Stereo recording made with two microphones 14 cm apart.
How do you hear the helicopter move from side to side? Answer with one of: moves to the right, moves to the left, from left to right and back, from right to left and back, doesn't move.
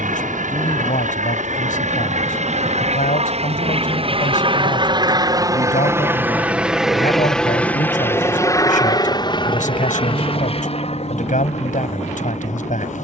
moves to the left.